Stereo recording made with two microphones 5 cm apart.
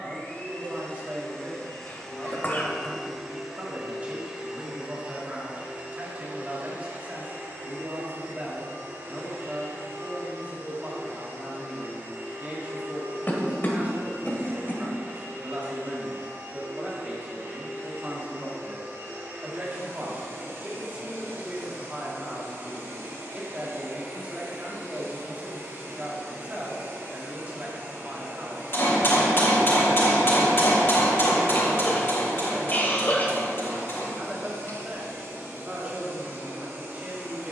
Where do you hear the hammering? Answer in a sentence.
You can hear the hammering on the left.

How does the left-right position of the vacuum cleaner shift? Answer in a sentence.
In this clip you hear the vacuum cleaner move from left to right.